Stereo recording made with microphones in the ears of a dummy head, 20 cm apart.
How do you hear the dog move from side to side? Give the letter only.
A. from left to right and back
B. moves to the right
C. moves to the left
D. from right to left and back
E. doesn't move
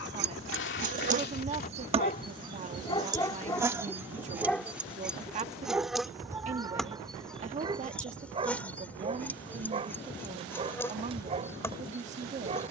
B.